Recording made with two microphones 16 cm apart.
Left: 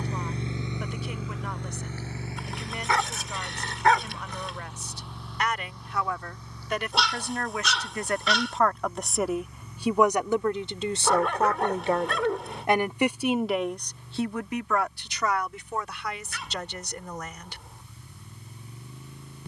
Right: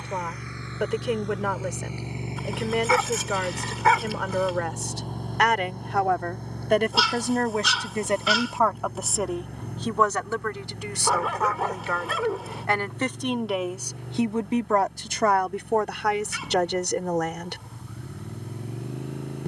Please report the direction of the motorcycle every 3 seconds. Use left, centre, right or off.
centre, right, right, right, right, right, right.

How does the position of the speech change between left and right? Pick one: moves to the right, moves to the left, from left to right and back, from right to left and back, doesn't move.
from right to left and back.